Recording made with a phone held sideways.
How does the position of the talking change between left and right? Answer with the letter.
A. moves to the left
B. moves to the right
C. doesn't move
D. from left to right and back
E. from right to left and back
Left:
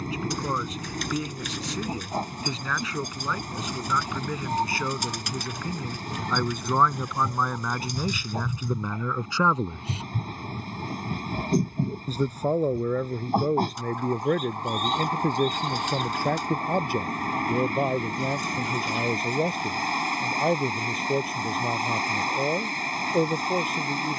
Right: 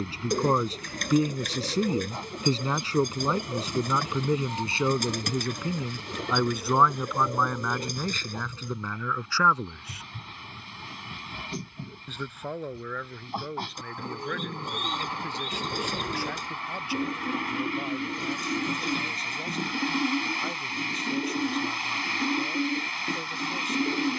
A.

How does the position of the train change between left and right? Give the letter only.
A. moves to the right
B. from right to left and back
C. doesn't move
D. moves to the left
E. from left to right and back
C.